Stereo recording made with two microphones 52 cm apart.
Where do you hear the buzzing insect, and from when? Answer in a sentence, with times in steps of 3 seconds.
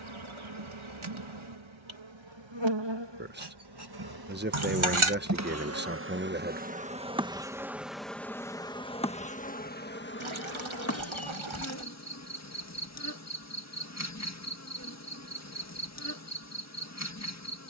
You can hear the buzzing insect on the right from 0 s, in the centre from 6 s and on the left from 9 s.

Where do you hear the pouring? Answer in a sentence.
You can hear the pouring on the right.